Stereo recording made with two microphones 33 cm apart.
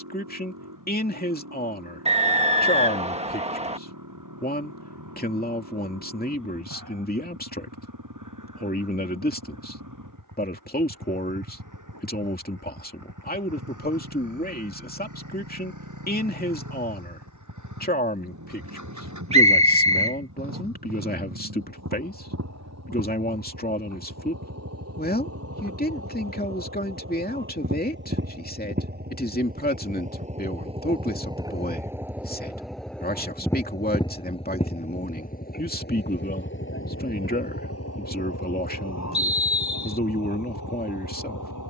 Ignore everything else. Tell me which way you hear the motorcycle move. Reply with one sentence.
In this clip you hear the motorcycle go from the right side to the left.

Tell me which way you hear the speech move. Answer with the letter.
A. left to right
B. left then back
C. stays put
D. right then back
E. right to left
C.